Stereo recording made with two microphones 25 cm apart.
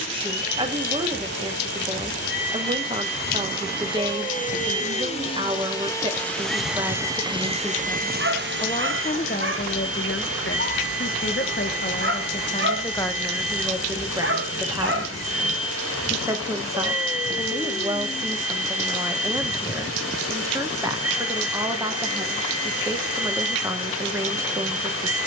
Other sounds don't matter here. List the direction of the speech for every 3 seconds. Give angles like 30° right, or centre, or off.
20° right, 20° right, centre, 50° left, centre, 10° right, 10° right, 10° right, 10° right.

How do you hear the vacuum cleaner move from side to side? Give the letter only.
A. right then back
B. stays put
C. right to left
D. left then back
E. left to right
E.